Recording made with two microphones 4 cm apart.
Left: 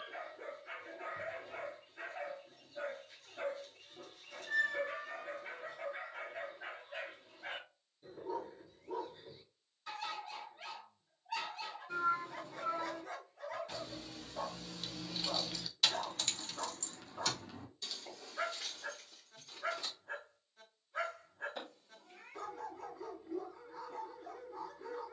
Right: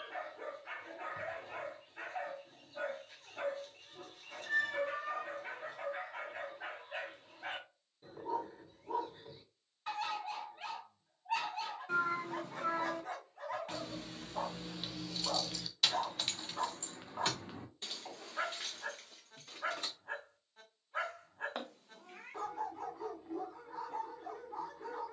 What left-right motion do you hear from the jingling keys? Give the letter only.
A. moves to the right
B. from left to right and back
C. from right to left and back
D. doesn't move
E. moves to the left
C.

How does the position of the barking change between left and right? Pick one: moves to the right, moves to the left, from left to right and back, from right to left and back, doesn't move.
doesn't move.